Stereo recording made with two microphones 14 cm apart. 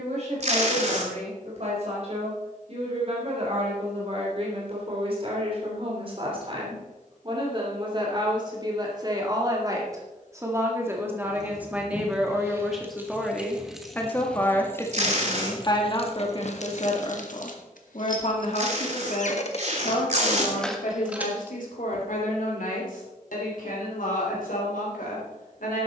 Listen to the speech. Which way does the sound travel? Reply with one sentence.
In this clip you hear the speech travel towards the left.